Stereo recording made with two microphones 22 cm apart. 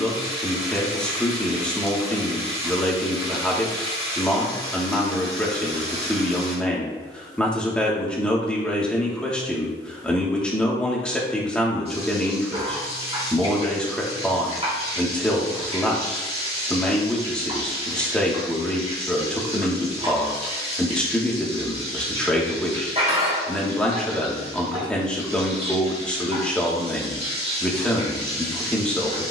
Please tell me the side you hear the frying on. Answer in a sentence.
In this clip you hear the frying on the right.